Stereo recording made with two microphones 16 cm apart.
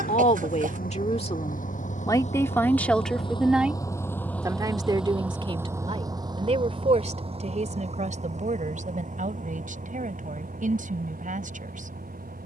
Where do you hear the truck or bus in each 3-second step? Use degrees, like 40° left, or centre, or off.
60° left, 10° left, 40° right, 50° right.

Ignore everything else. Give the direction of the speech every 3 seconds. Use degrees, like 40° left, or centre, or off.
30° left, 20° right, 50° right, 50° right.